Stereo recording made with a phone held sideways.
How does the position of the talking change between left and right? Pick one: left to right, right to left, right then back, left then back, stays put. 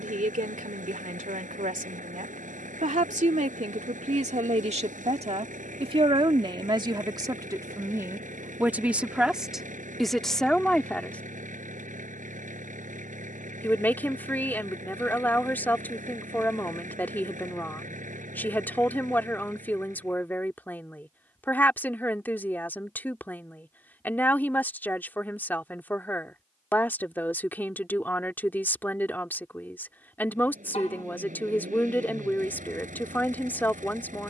right to left.